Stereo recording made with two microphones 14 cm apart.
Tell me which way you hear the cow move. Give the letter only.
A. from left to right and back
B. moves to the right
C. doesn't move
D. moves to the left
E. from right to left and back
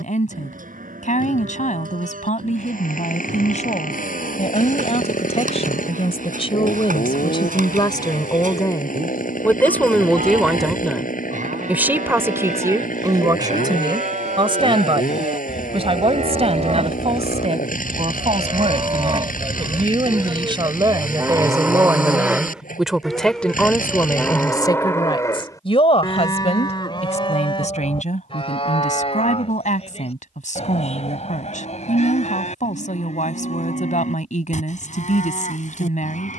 D.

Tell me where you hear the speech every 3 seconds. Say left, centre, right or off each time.
left, left, left, centre, right, right, right, centre, left, left, left, left.